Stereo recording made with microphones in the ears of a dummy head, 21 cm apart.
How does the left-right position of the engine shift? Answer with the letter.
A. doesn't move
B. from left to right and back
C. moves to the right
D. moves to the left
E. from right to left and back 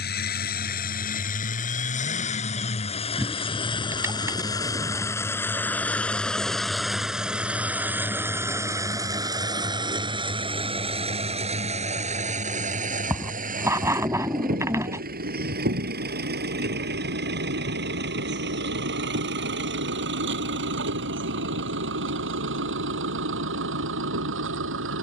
C.